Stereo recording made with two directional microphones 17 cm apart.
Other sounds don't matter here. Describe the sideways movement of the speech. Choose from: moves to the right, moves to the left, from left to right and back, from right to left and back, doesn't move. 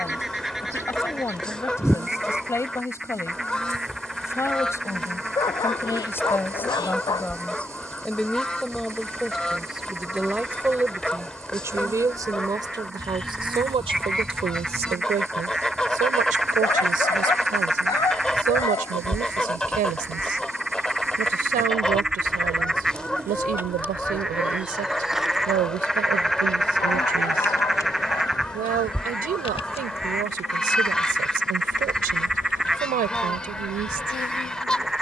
moves to the right.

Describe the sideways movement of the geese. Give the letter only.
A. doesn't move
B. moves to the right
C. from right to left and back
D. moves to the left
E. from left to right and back
A.